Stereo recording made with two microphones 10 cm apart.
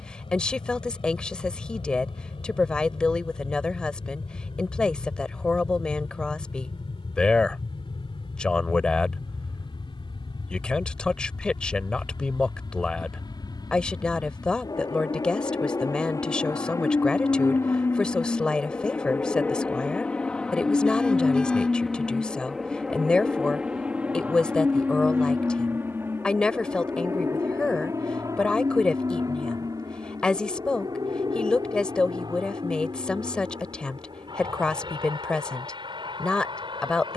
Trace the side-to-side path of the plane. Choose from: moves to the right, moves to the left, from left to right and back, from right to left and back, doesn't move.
moves to the right.